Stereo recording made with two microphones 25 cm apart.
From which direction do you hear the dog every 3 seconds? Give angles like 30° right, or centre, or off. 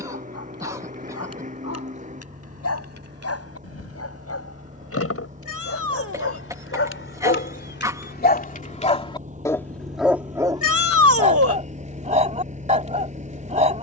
80° left, 70° left, 50° left, 10° right, 30° right.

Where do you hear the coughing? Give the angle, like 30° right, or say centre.
10° right.